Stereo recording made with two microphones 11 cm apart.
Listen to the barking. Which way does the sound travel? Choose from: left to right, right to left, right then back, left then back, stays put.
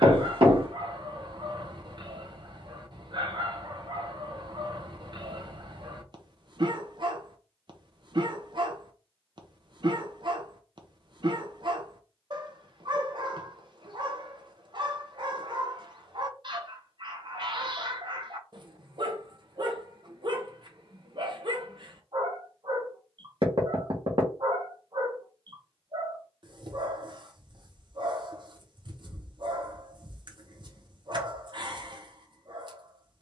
stays put.